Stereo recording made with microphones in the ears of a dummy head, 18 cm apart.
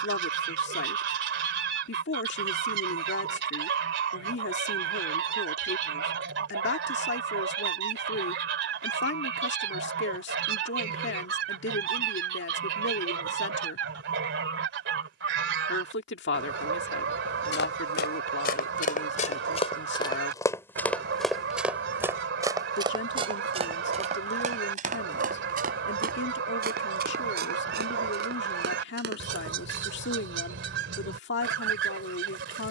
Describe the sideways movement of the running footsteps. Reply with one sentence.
In this clip you hear the running footsteps travel towards the right.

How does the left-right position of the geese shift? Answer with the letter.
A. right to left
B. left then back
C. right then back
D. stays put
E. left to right
D.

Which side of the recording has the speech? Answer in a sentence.
In this clip you hear the speech on the left.